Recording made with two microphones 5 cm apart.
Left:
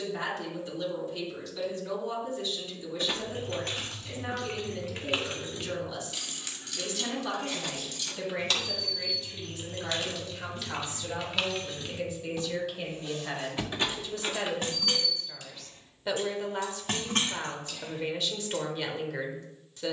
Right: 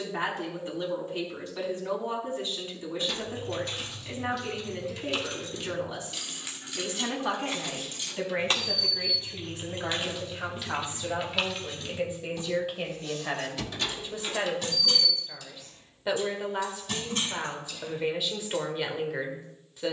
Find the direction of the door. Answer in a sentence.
You can hear the door on the left.